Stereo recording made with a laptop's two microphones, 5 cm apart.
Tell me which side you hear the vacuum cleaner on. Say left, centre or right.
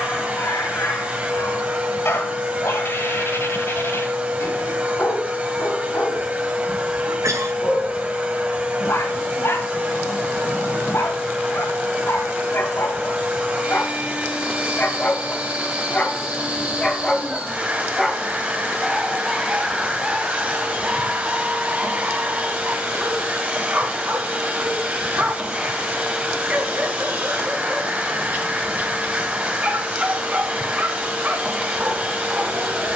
right.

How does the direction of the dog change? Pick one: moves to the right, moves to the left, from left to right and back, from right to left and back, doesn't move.
moves to the right.